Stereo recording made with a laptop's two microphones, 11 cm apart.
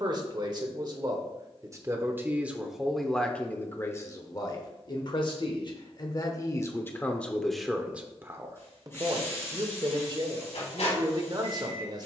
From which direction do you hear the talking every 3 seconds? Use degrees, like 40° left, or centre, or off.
30° right, 30° left, 10° left, 40° right.